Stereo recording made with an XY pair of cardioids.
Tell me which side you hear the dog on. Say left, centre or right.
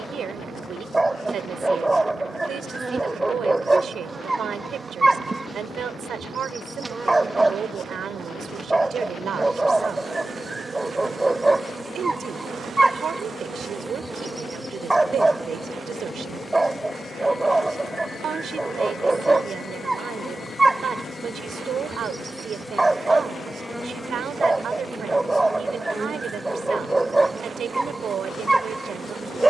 centre.